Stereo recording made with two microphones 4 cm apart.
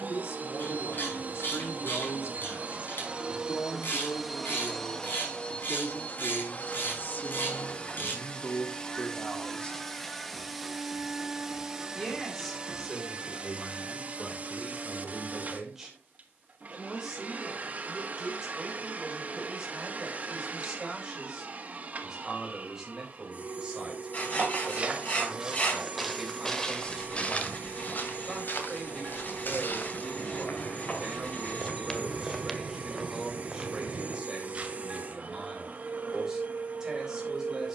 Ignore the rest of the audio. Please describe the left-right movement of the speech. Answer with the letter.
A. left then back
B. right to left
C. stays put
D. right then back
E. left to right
E.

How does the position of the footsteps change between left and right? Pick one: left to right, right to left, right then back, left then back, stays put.
left then back.